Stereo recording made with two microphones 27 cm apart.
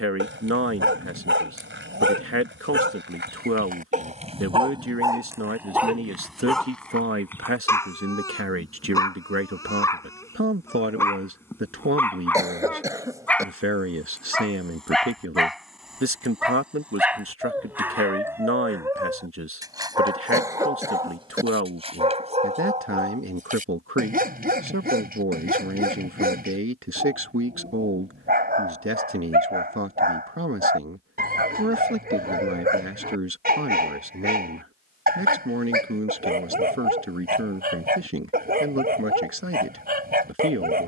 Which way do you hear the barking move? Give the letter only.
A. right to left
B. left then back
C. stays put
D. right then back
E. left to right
B.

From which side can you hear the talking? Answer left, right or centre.
right.